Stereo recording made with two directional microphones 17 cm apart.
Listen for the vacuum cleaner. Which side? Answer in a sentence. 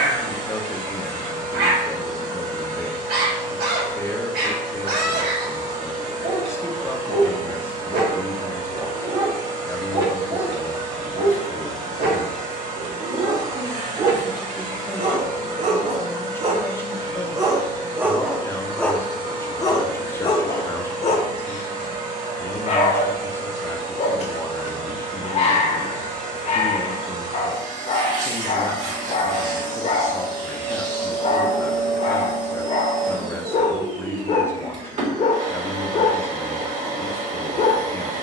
You can hear the vacuum cleaner on the right.